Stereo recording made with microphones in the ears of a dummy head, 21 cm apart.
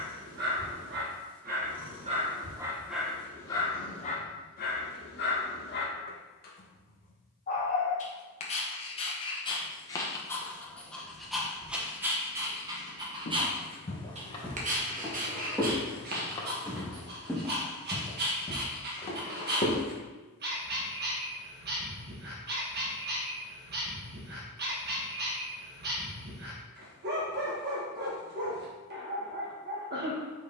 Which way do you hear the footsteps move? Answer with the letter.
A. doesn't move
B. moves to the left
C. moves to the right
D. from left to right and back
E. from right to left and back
D.